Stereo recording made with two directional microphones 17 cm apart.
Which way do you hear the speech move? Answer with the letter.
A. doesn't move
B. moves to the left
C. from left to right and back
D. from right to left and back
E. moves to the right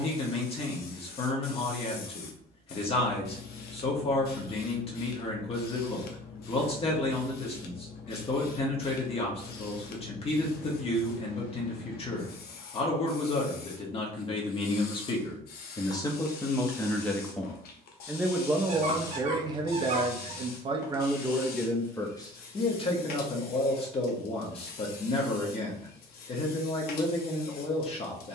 C.